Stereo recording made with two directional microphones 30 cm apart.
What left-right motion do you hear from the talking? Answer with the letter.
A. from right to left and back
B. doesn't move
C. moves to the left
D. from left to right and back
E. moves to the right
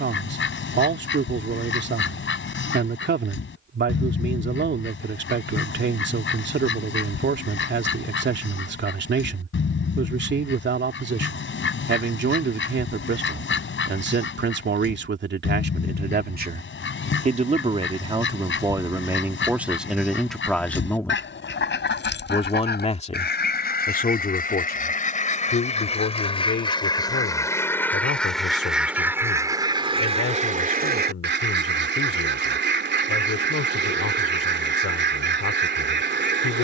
C.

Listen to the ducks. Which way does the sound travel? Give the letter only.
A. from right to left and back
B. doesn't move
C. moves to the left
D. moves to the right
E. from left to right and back
D.